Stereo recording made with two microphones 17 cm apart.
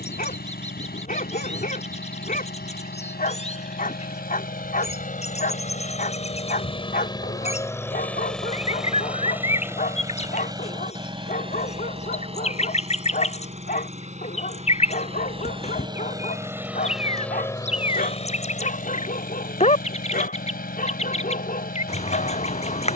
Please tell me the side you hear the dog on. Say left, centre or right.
left.